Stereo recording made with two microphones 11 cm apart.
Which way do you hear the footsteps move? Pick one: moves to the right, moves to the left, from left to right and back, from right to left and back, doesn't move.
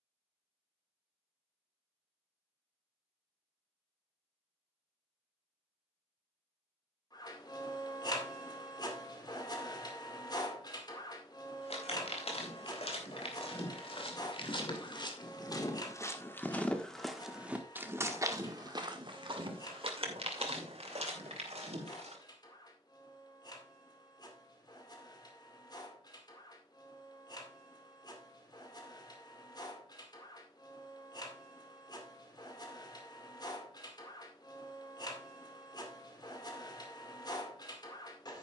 moves to the right.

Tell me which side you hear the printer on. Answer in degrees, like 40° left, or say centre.
40° left.